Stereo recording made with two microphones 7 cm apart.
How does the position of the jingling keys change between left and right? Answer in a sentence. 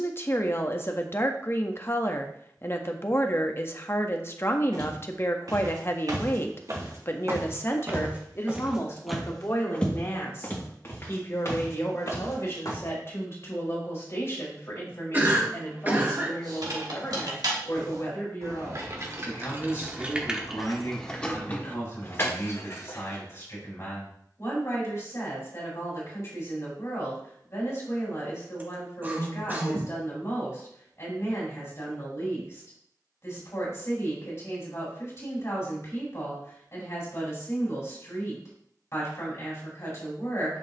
In this clip you hear the jingling keys go from the right side to the left.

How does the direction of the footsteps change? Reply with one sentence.
You can hear the footsteps travel towards the left.